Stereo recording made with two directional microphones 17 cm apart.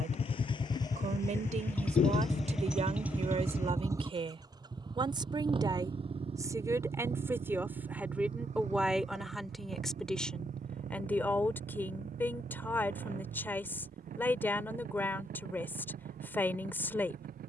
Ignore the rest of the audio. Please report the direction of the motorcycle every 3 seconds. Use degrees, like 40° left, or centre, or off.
10° left, 20° right, 40° right, 50° right, 50° right, 50° right.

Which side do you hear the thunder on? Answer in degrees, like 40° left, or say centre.
40° left.